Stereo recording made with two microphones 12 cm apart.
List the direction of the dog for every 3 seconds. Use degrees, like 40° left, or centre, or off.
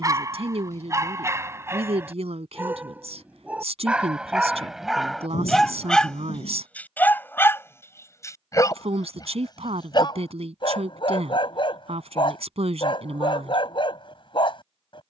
20° right, centre, 20° left, 40° left, 50° left.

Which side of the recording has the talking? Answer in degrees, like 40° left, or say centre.
60° right.